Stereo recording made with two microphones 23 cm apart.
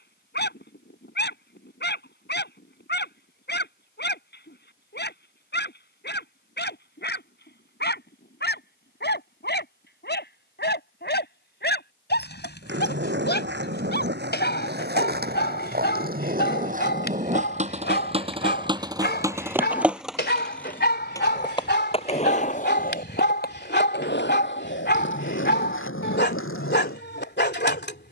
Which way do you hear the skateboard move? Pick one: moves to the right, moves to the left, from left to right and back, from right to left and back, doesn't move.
moves to the left.